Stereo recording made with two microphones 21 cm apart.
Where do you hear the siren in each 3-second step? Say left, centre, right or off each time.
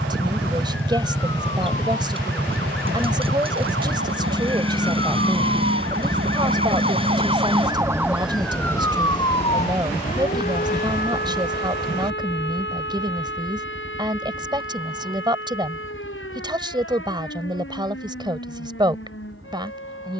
right, right, right, left, left, left, left.